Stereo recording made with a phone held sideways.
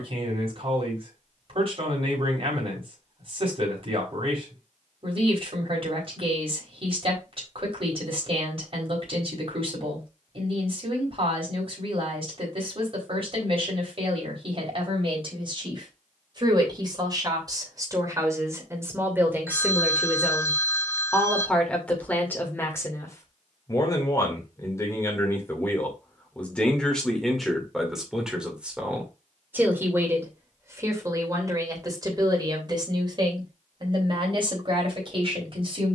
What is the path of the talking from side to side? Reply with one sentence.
You can hear the talking go left and come back.